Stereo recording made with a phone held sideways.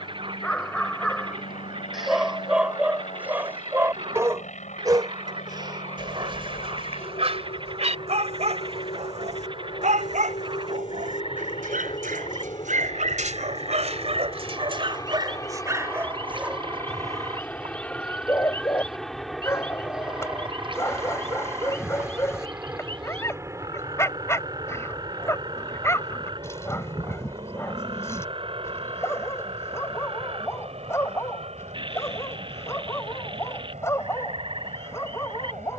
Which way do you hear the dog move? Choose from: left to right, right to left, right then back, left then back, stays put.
right then back.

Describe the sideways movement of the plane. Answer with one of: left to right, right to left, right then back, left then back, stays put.
left to right.